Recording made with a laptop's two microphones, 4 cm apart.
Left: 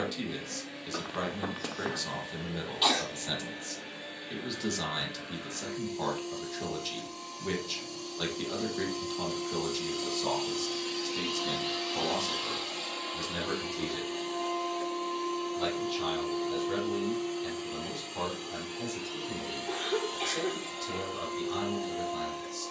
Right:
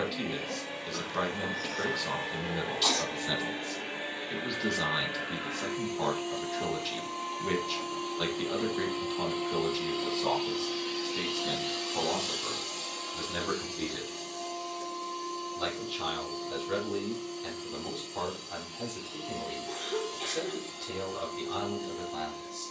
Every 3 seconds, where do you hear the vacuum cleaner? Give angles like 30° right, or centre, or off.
70° right, 60° right, 50° right, 10° right, 30° left, 50° left, 60° left, 60° left.